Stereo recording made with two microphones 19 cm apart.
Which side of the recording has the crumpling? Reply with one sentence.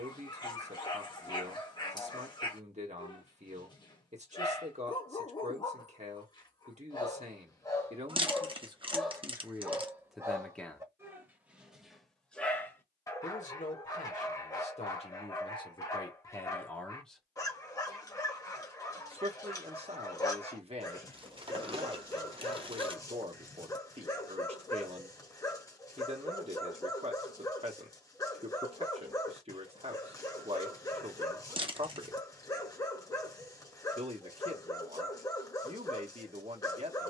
You can hear the crumpling on the right.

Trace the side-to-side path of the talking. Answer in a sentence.
You can hear the talking go left and come back.